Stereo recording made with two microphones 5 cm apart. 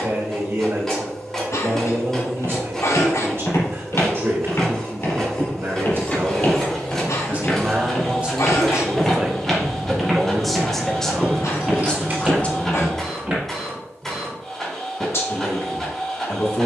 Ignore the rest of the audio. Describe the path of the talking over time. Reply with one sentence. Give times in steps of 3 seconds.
In this clip you hear the talking on the right from 0 s, in the centre from 9 s and on the left from 12 s.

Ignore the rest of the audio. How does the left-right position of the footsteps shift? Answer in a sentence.
You can hear the footsteps go from the left side to the right.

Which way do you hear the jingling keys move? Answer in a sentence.
In this clip you hear the jingling keys travel towards the right.